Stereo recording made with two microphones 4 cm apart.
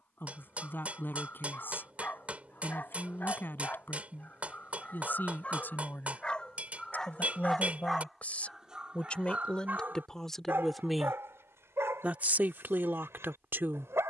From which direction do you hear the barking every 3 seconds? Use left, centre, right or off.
left, left, centre, right, right.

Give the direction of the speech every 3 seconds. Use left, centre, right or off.
left, left, left, centre, right.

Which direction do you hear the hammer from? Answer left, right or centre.
right.